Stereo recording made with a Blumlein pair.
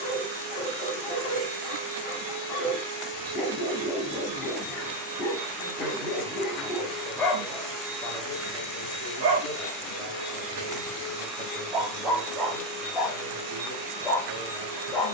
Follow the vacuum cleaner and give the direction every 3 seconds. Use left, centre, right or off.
right, right, centre, centre, right.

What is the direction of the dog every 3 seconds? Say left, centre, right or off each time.
left, left, centre, right, centre.